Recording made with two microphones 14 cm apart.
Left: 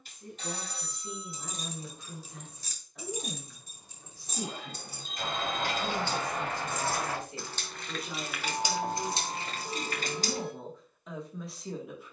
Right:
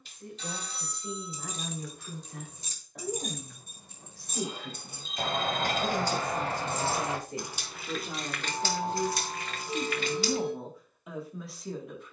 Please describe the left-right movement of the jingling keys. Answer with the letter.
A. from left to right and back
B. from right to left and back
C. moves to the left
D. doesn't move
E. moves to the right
A.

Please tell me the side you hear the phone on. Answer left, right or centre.
left.